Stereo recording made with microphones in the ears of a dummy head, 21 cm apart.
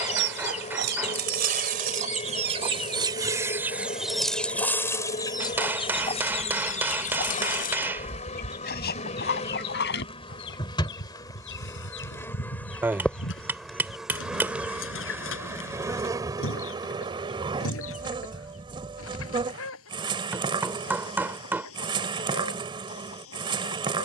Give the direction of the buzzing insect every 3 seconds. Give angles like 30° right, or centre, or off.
30° left, 30° left, 30° left, 20° left, centre, 20° right, 20° right, 20° right.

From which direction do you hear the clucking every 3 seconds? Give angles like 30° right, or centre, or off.
40° right, centre, 40° left, 50° left, 60° left, 70° left, 70° left, 70° left.